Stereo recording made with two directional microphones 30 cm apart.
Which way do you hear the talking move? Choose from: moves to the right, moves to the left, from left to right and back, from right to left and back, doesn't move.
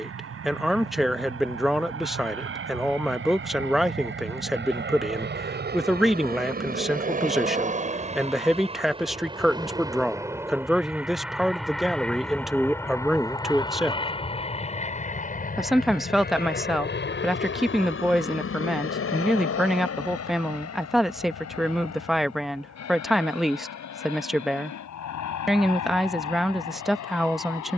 doesn't move.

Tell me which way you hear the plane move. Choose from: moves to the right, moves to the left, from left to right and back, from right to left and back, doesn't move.
moves to the left.